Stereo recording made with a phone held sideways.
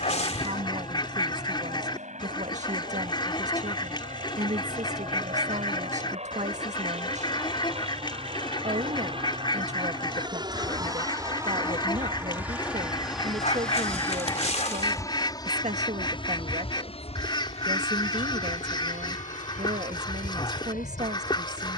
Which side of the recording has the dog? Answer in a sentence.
You can hear the dog on the left.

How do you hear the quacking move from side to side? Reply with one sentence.
You can hear the quacking stay put.